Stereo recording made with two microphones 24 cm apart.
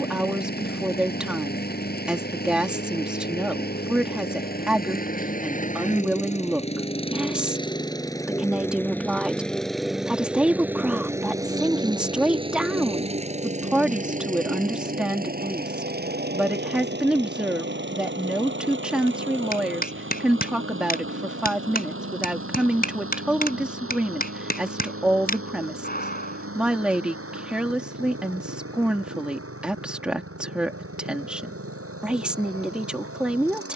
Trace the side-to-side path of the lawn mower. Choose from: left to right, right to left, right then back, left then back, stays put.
left to right.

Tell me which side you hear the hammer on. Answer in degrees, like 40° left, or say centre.
40° left.